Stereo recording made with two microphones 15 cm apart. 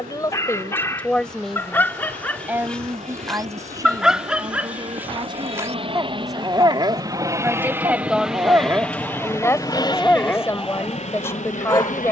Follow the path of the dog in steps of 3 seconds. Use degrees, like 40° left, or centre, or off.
10° left, 10° right, 20° right, 10° left.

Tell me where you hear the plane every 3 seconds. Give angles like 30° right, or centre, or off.
60° right, 50° right, 20° right, 40° left.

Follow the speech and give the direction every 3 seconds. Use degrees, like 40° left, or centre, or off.
10° left, 30° right, 10° right, 20° left.